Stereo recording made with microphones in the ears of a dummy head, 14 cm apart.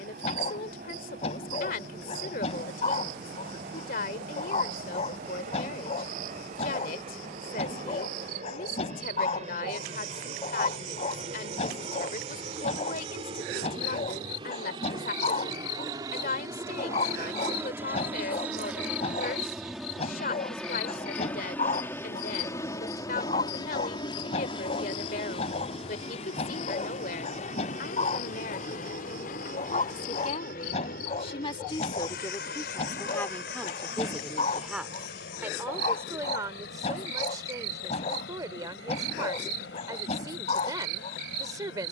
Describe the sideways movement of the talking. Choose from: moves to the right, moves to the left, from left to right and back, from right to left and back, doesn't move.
moves to the right.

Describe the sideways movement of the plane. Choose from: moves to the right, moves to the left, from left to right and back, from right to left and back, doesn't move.
moves to the left.